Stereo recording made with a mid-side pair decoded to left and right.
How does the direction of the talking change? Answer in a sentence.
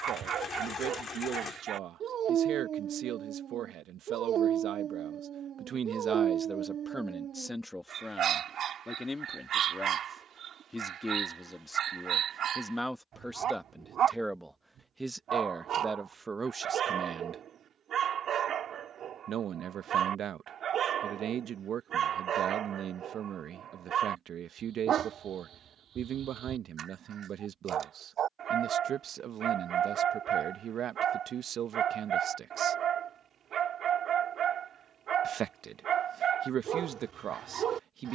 You can hear the talking go left and come back.